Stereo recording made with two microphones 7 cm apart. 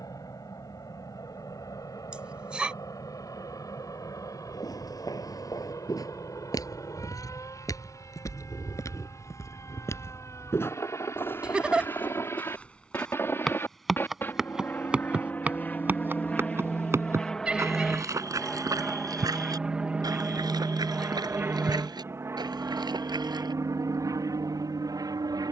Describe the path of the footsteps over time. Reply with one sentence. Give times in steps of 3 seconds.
You can hear the footsteps not at all from 0 s, on the left from 3 s, in the centre from 12 s, on the right from 15 s and not at all from 24 s.